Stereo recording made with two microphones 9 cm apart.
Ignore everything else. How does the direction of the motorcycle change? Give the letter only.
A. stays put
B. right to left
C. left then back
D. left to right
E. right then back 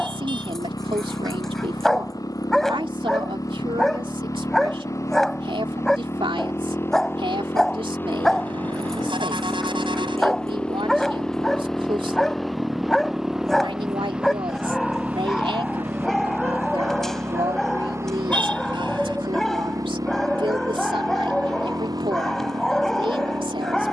D.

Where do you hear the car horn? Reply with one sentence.
In this clip you hear the car horn on the right.